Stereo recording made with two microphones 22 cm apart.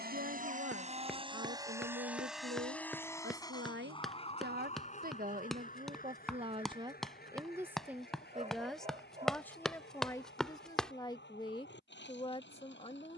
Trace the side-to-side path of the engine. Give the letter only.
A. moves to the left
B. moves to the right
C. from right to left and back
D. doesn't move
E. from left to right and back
A.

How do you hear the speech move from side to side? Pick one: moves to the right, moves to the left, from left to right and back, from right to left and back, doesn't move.
moves to the left.